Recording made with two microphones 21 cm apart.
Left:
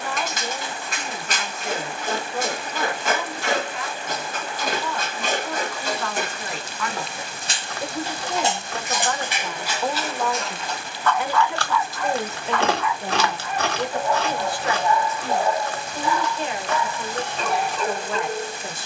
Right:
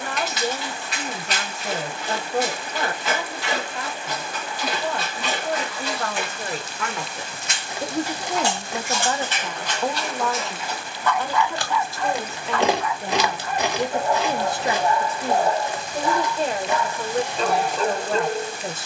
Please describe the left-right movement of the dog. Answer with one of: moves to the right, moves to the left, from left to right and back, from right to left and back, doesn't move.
moves to the right.